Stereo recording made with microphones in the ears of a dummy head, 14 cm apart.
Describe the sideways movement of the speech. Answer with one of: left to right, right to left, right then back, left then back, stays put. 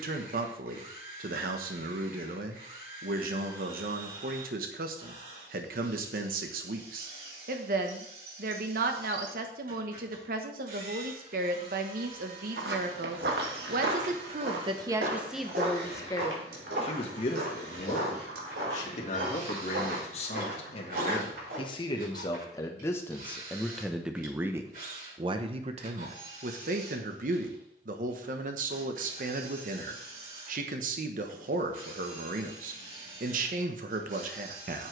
left then back.